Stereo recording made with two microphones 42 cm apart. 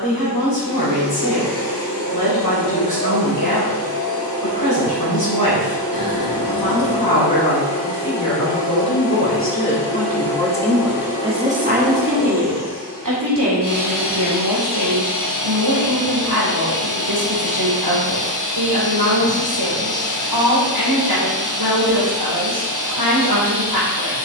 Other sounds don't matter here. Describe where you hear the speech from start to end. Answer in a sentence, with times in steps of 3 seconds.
You can hear the speech on the left from 0 s, in the centre from 9 s and on the right from 12 s.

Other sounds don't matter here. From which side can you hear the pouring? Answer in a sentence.
You can hear the pouring on the right.